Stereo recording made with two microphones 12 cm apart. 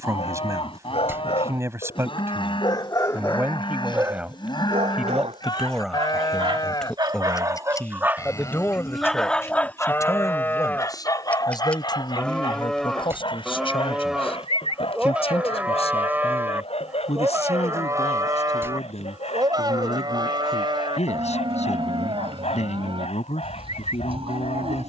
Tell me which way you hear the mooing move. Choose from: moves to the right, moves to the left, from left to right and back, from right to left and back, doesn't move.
moves to the right.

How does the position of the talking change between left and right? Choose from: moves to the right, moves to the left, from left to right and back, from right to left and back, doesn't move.
moves to the left.